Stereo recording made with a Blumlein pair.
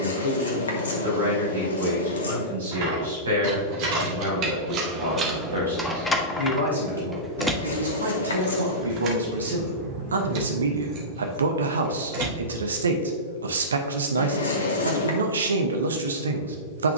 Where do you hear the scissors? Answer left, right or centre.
left.